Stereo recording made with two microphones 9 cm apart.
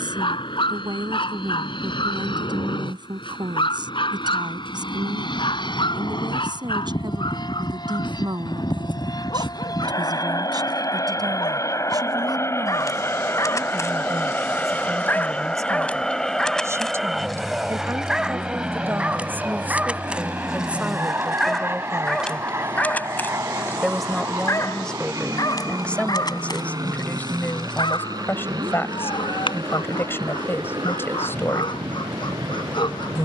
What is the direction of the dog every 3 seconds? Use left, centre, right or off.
left, left, left, left, left, centre, centre, centre, left, left, left.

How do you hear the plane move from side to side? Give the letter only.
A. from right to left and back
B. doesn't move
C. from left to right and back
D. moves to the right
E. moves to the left
D.